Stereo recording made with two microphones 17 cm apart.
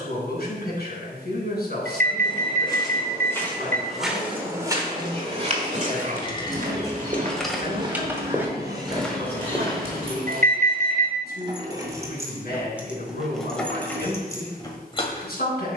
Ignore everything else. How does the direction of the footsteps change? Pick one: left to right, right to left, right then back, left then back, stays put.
right then back.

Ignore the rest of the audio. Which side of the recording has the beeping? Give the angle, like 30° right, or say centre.
60° right.